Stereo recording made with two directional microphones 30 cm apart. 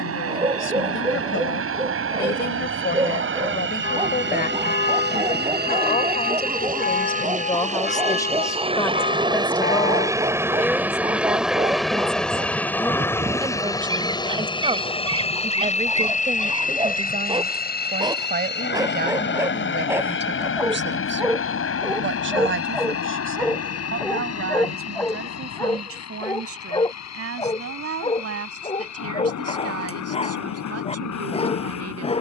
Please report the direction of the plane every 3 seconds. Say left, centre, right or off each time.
right, right, right, centre, centre, left, left, left, left, left, left.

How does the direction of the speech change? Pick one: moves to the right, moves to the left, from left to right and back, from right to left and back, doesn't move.
moves to the right.